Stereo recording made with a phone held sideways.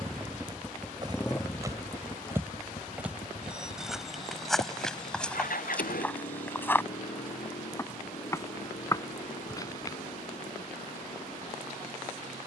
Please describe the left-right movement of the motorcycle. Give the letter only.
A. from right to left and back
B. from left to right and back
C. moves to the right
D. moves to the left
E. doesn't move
D.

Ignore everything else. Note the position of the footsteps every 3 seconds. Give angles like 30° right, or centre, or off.
20° right, centre, 20° left, 20° left.